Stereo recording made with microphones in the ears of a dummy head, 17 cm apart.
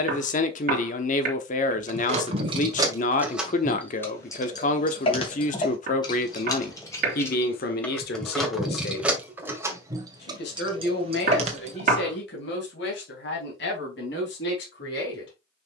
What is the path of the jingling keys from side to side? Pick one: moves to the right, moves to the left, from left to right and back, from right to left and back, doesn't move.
from right to left and back.